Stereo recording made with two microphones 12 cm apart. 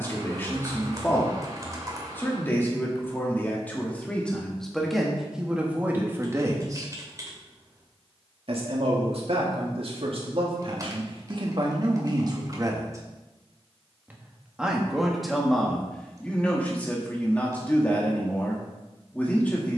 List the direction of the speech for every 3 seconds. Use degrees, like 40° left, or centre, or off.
20° left, 10° left, 40° right, 60° right, 20° right, 10° left, 10° left.